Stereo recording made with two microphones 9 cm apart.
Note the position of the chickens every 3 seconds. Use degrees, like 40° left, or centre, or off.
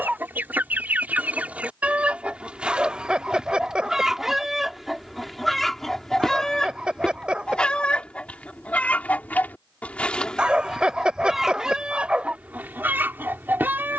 20° right, centre, 10° left, 10° left, 20° right.